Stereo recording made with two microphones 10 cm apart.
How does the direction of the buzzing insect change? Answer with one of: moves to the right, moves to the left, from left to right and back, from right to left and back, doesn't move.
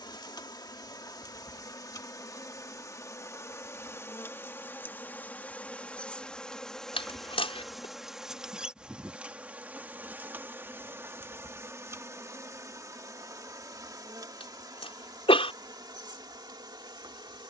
moves to the right.